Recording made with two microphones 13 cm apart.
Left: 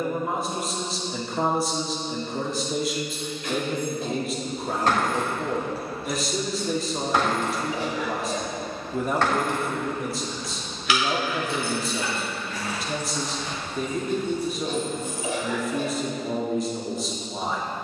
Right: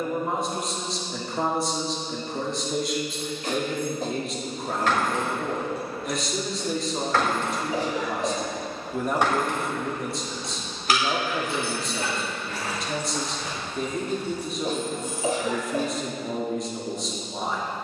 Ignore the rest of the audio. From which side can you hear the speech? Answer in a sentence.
You can hear the speech in the centre.